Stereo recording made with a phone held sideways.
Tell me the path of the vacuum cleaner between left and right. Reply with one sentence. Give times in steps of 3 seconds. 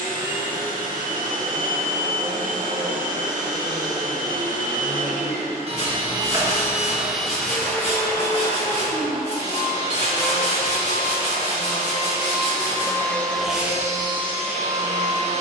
In this clip you hear the vacuum cleaner on the right from 0 s, in the centre from 6 s, on the left from 9 s and in the centre from 12 s.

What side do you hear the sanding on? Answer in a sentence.
You can hear the sanding on the left.